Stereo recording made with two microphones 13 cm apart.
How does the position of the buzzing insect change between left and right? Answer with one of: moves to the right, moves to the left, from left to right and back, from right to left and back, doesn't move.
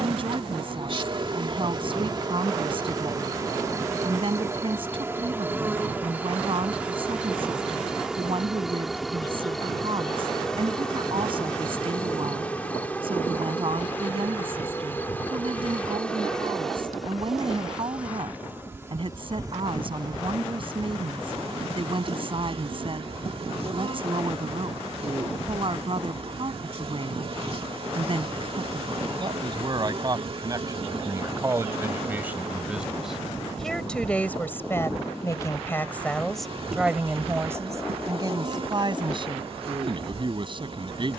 from right to left and back.